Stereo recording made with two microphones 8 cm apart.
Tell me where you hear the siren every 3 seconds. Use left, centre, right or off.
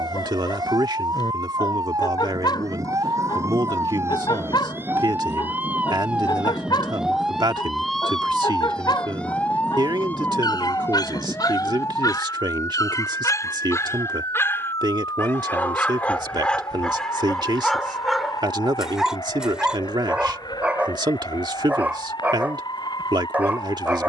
right, right, centre, left, left, left, left, left.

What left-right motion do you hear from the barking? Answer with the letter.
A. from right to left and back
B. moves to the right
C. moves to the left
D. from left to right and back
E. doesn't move
B.